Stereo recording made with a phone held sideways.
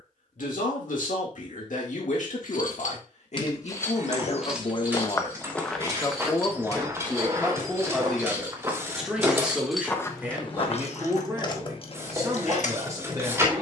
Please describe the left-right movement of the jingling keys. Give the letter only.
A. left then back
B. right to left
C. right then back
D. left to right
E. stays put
C.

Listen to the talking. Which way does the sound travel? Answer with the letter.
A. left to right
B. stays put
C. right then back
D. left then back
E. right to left
A.